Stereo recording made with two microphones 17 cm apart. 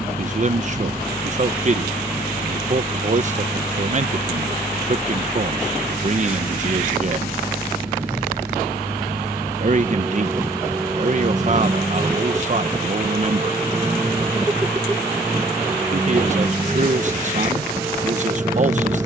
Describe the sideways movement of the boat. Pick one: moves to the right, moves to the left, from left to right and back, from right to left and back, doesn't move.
doesn't move.